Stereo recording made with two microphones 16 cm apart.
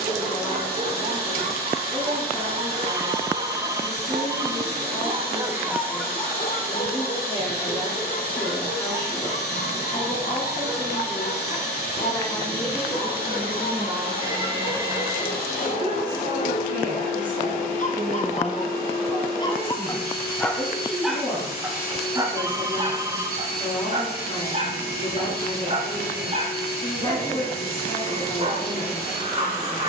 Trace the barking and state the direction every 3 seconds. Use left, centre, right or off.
right, right, left, left, left, left, left, right, right, right.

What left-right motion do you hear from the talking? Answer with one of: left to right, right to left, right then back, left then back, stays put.
right then back.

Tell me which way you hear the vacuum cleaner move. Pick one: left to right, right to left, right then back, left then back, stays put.
stays put.